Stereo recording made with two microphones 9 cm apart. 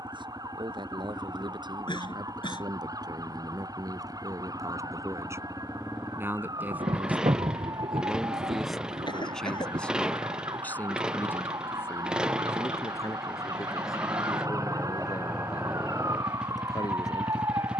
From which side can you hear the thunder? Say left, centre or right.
right.